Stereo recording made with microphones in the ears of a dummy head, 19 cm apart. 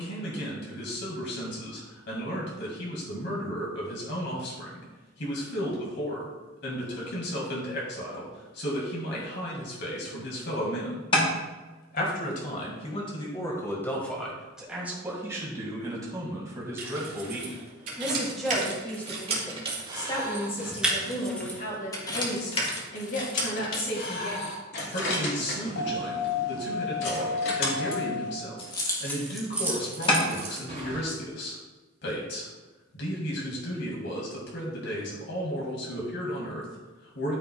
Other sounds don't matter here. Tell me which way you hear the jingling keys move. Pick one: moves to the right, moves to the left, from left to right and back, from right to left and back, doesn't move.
from right to left and back.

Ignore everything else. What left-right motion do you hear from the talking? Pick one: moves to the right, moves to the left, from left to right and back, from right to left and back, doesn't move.
from left to right and back.